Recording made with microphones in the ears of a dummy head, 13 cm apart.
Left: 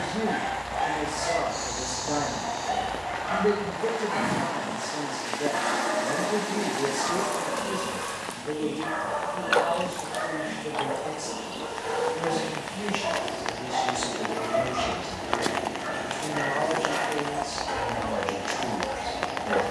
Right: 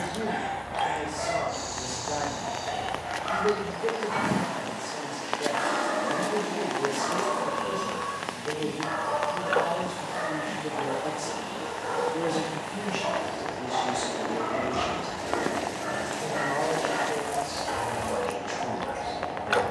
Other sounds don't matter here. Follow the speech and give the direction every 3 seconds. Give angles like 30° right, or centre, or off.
30° left, 30° left, 10° left, 30° right, 30° right, 10° left, 20° left.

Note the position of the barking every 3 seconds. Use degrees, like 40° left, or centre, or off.
60° right, 60° right, 60° right, 50° right, 30° right, centre, 10° left.